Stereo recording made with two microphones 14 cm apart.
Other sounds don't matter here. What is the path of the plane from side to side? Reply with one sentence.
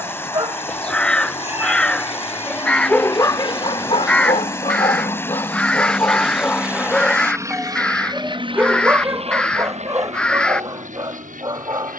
You can hear the plane go from the left side to the right.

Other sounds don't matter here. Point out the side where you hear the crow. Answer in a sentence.
In this clip you hear the crow in the centre.